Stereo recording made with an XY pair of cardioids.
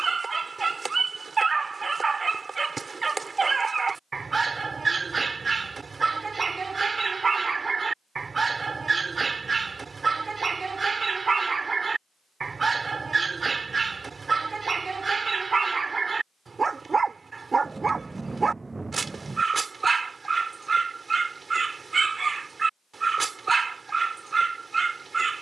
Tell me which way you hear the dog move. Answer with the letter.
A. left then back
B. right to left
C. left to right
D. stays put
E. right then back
D.